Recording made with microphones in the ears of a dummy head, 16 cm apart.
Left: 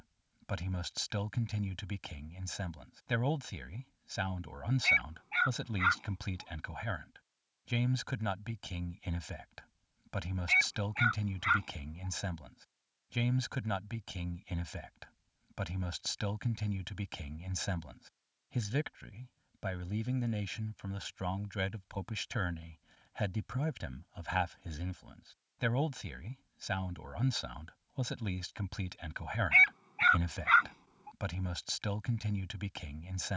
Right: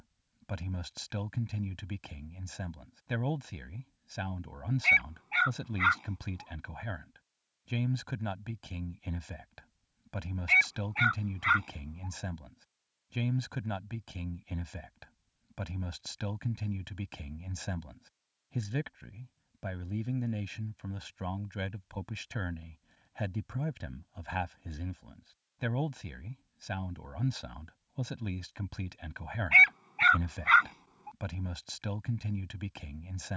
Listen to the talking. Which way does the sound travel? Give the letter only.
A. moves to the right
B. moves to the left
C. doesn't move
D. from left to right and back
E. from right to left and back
C.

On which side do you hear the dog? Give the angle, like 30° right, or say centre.
20° right.